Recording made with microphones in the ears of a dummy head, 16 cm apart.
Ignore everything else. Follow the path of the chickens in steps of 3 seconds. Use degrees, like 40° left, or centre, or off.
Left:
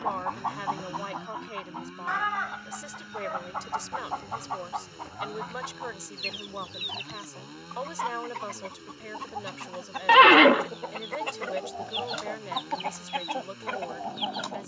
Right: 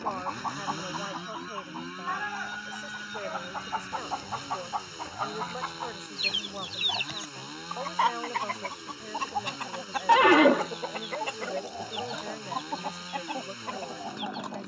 50° left, centre, 30° right, 10° right, 50° left.